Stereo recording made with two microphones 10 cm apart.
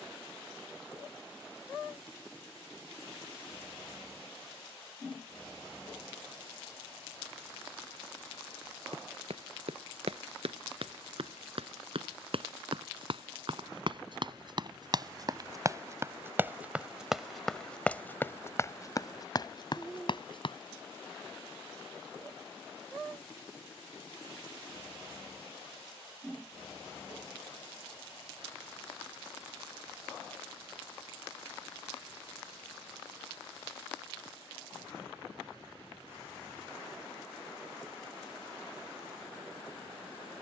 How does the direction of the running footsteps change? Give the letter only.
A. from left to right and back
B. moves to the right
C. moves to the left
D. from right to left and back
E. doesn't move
C.